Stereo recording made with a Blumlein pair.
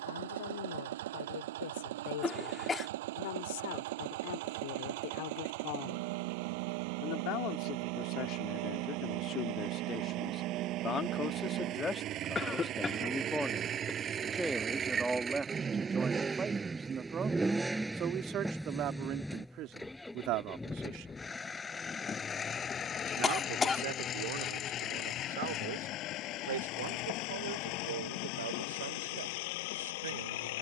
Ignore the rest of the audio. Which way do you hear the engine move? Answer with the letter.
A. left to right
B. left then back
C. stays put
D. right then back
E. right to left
E.